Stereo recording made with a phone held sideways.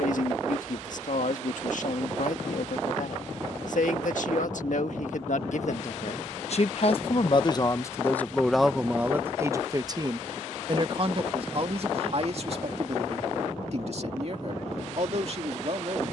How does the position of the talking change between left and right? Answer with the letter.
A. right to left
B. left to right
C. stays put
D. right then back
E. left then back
B.